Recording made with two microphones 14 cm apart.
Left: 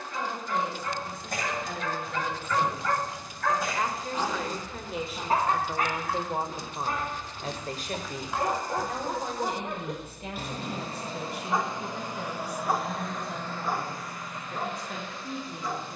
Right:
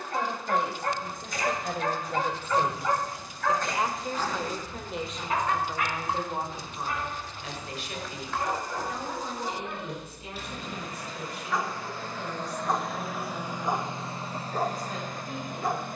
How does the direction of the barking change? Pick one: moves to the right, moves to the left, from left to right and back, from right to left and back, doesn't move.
from right to left and back.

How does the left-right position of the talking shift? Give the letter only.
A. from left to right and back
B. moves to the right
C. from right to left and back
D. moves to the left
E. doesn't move
D.